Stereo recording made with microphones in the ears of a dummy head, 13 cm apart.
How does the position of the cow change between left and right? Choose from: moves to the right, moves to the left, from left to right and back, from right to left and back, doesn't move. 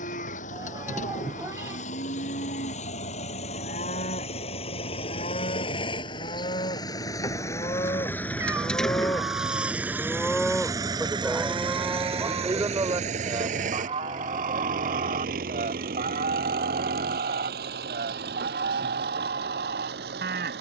moves to the right.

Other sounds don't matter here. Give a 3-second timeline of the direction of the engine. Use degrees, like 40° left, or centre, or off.
50° left, 40° left, 20° left, 20° right, 50° right, 70° right, 80° right.